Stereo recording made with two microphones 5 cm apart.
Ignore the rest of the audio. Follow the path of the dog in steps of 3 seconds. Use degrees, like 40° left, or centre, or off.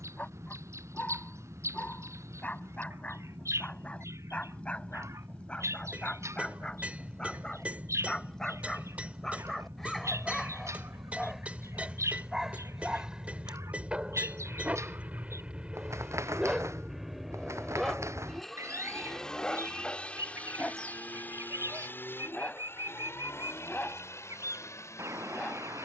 30° left, 20° left, 10° left, centre, 20° right, 10° right, 10° left, 30° left, 30° left.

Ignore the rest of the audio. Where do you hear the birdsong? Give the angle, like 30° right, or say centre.
60° right.